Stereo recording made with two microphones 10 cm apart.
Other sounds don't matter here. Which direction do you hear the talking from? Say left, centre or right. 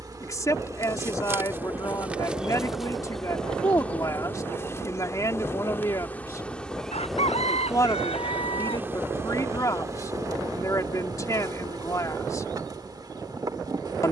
left.